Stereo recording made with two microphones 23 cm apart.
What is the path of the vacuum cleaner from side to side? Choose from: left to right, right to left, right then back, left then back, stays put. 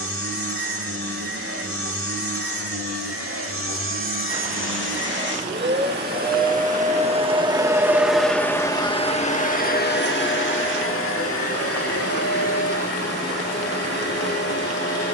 right to left.